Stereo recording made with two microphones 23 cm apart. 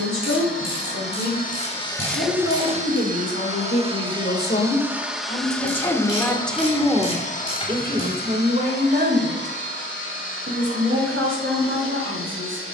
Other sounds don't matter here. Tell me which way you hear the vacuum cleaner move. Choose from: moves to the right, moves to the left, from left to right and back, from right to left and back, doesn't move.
from left to right and back.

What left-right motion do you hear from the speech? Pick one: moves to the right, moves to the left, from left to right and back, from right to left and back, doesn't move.
moves to the right.